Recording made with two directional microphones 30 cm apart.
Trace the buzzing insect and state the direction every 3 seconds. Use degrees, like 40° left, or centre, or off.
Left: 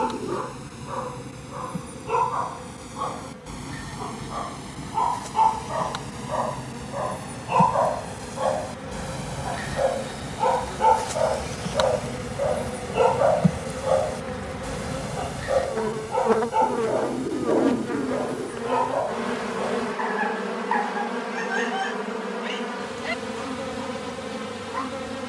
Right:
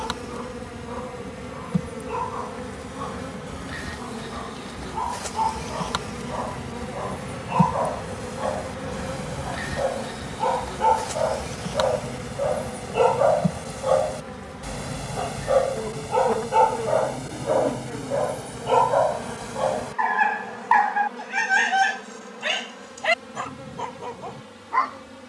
50° right, 40° right, 30° right, centre, 20° left, 40° left, 50° left, 60° left, 70° left.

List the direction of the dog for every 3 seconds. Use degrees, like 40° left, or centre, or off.
40° left, 40° left, 30° left, 10° left, 10° right, 30° right, 50° right, 60° right, 60° right.